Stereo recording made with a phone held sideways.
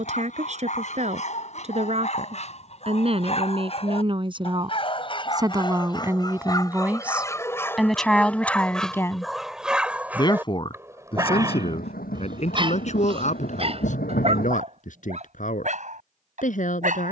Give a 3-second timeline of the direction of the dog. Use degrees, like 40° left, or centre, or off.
50° left, 40° left, 20° left, 10° right, 40° right, 60° right.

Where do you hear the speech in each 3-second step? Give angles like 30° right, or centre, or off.
50° right, 30° right, centre, 40° left, 60° left, 60° left.